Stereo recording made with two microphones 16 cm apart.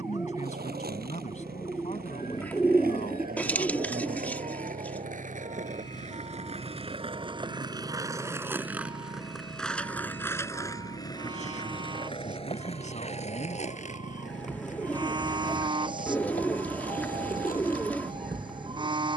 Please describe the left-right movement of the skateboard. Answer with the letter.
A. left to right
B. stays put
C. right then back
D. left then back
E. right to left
E.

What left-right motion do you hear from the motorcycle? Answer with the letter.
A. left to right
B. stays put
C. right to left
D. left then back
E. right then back
B.